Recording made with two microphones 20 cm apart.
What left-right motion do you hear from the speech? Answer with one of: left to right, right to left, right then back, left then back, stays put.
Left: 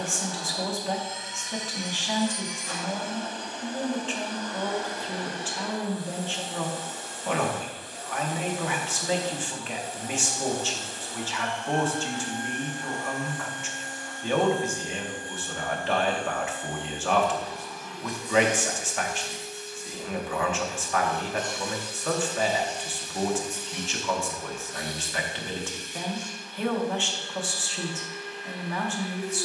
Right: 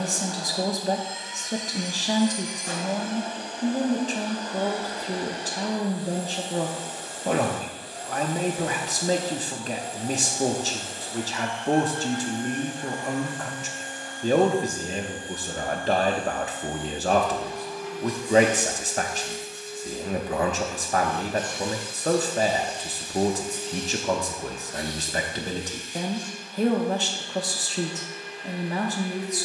stays put.